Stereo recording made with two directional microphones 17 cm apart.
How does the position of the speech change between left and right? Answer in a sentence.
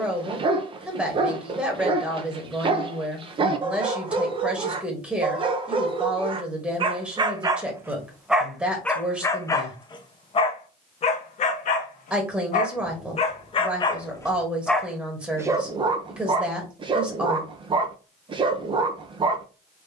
In this clip you hear the speech stay put.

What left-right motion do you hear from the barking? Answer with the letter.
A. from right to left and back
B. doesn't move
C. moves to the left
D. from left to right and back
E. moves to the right
A.